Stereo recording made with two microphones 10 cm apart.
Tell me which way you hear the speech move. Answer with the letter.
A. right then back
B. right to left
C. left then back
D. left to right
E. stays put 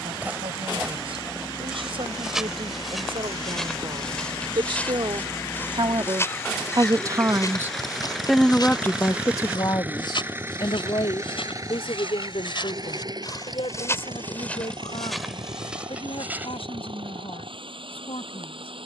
B.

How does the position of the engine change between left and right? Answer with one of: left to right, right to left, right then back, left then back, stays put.
left to right.